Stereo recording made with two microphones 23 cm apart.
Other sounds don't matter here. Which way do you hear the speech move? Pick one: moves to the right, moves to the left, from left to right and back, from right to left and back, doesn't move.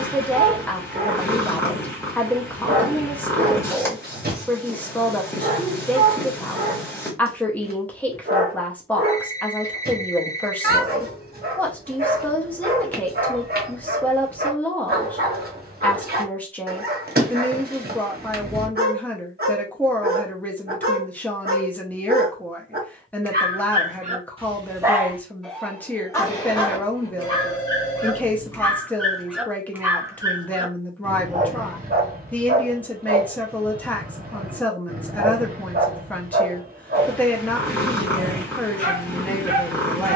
doesn't move.